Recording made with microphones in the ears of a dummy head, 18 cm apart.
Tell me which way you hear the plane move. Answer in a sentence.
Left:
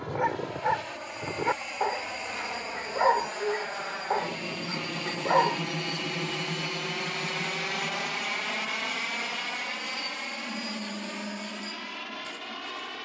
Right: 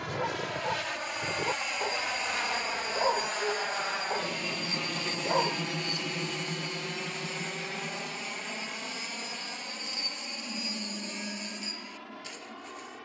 In this clip you hear the plane move from right to left.